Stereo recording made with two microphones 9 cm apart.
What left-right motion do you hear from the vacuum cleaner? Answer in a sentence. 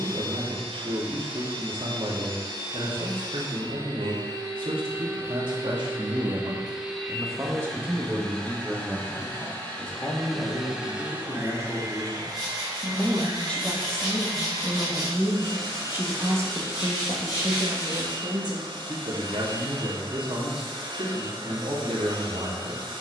You can hear the vacuum cleaner go left and come back.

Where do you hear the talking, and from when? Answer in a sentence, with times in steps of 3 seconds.
In this clip you hear the talking on the right from 0 s, on the left from 9 s, in the centre from 12 s and on the right from 15 s.